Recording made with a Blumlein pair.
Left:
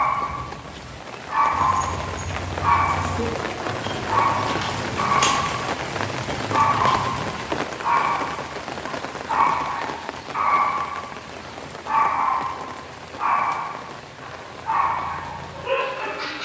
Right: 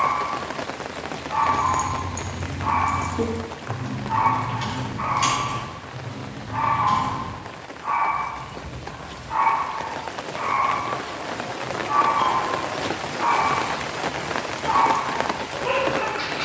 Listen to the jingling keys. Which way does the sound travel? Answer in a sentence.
In this clip you hear the jingling keys move from right to left.